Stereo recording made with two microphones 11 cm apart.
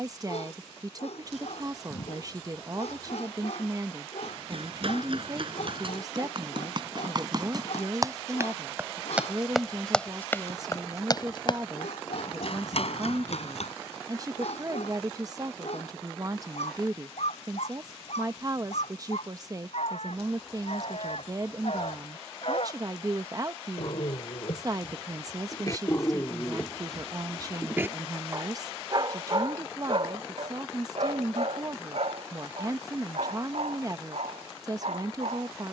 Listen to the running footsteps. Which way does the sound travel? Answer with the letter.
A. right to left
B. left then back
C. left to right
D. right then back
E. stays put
A.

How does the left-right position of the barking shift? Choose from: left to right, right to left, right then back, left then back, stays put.
left to right.